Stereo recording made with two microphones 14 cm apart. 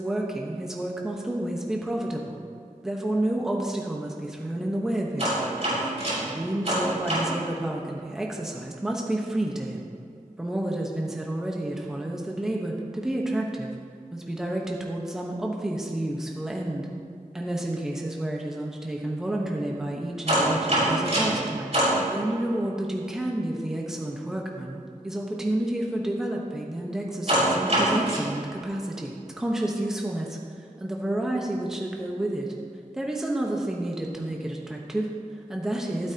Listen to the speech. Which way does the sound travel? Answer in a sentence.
In this clip you hear the speech stay put.